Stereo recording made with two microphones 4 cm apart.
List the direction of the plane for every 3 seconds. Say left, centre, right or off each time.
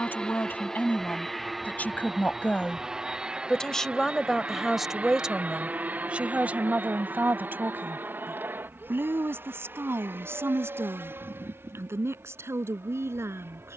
centre, right, right, right, right.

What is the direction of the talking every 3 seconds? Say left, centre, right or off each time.
left, centre, right, right, right.